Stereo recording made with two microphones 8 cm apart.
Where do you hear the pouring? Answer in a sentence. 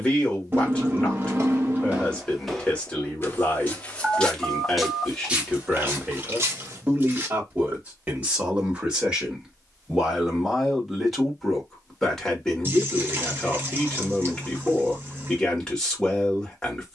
You can hear the pouring on the right.